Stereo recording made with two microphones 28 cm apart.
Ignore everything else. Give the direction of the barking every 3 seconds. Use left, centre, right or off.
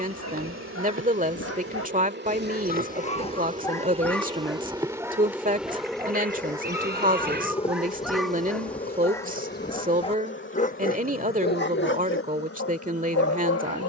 left, centre, centre, left, left.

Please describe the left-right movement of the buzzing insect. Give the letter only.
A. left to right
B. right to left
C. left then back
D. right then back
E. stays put
B.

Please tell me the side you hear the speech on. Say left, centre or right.
right.